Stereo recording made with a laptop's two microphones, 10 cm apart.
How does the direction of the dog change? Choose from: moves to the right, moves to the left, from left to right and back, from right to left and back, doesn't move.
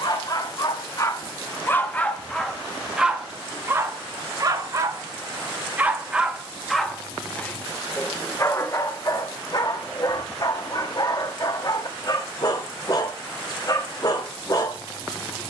from left to right and back.